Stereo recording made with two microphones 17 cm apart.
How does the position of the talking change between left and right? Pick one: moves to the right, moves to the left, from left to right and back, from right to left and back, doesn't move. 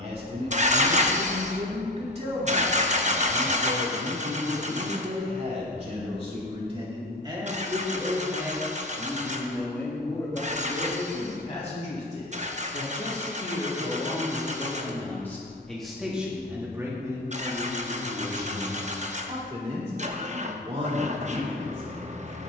from right to left and back.